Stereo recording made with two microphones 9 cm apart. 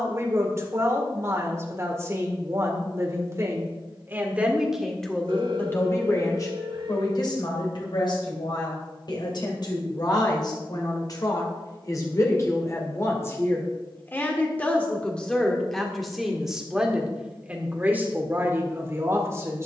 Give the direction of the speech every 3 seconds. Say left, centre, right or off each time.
right, centre, left, left, left, centre, right.